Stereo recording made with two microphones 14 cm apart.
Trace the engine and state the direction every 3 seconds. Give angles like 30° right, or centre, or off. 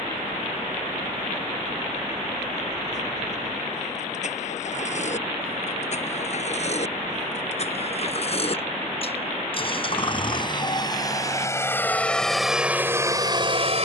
50° left, 50° left, 50° left, 30° left, 20° right.